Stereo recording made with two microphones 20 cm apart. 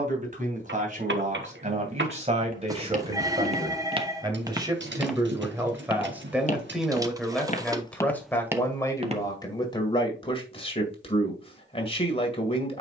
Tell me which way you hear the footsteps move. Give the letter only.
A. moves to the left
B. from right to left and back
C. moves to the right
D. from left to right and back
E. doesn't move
B.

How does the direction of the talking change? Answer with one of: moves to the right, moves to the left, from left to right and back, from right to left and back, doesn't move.
moves to the left.